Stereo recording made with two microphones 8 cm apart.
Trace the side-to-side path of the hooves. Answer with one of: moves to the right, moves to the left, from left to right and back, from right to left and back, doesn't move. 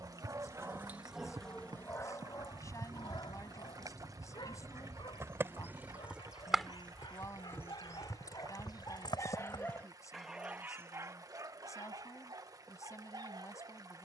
moves to the left.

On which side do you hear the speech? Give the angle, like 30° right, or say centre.
40° left.